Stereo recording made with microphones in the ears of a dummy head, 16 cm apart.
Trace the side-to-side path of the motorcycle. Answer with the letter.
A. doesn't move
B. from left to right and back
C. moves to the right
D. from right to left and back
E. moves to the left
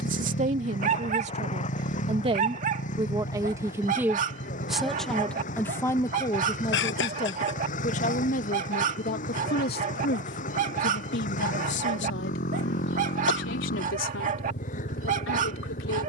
A.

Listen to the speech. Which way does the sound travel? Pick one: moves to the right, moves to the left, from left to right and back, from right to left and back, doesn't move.
moves to the left.